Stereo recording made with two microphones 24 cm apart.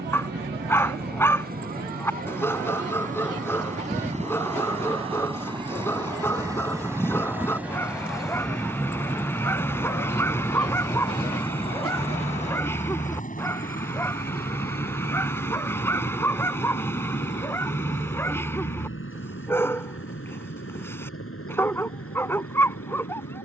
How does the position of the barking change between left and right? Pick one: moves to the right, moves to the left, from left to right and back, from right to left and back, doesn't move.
doesn't move.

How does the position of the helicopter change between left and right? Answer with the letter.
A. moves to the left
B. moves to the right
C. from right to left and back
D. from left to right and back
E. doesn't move
A.